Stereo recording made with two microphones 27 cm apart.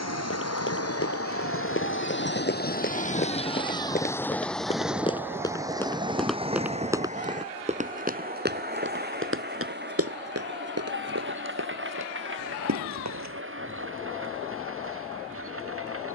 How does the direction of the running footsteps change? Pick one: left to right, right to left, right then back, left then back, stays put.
left to right.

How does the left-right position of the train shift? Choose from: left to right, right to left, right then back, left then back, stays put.
left to right.